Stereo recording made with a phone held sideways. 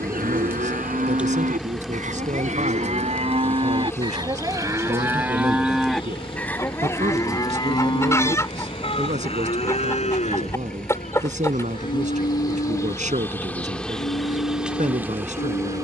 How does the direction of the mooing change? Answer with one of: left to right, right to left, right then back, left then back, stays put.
right to left.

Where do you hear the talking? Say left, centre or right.
right.